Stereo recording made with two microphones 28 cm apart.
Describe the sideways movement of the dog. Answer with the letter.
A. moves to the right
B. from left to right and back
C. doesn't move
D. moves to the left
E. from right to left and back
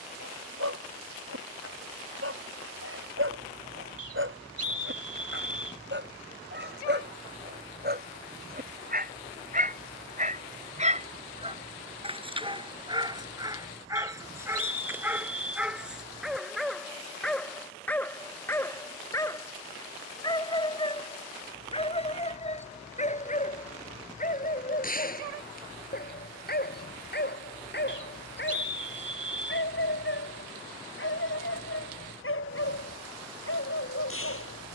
D.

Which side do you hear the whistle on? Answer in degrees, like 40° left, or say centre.
60° right.